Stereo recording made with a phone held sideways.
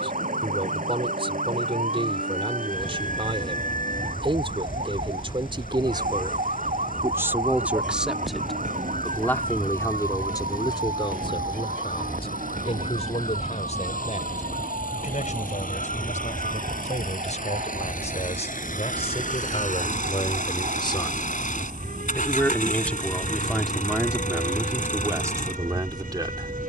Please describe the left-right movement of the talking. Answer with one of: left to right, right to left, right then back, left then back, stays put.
left then back.